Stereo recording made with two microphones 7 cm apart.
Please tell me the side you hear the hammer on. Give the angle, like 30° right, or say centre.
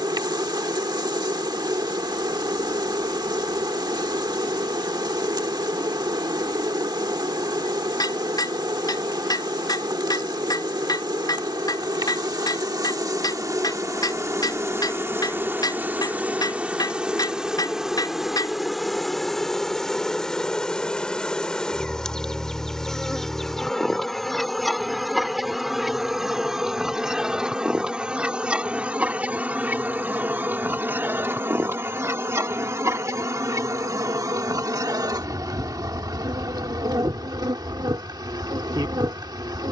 60° left.